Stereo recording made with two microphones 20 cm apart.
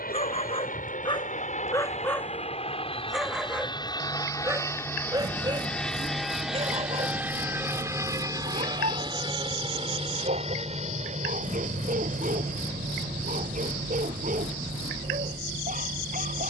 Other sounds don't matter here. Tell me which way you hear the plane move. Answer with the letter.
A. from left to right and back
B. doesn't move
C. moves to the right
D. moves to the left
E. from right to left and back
C.